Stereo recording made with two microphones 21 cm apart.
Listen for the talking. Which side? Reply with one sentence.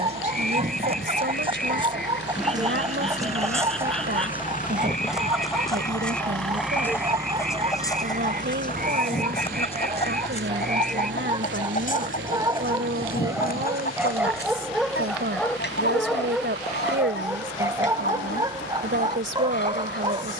You can hear the talking on the right.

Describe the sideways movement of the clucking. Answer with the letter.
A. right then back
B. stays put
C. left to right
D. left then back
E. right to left
E.